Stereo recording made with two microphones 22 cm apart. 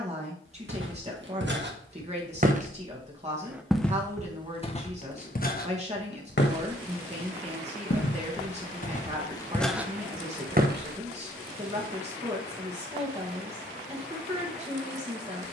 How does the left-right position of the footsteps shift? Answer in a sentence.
In this clip you hear the footsteps go left and come back.